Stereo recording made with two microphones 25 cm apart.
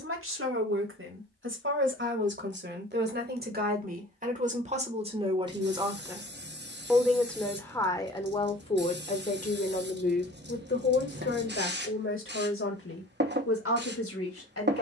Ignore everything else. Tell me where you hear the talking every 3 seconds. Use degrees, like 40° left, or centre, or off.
50° right, 30° right, 10° left, 40° left, 60° left.